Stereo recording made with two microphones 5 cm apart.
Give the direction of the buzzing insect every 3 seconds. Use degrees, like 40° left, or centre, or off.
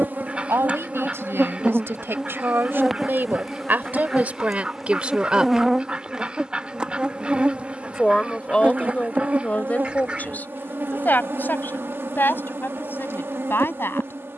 20° right, centre, 20° right, 40° right, 50° right.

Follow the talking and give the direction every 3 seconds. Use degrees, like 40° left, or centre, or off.
60° right, 30° right, 20° left, 30° left, 50° left.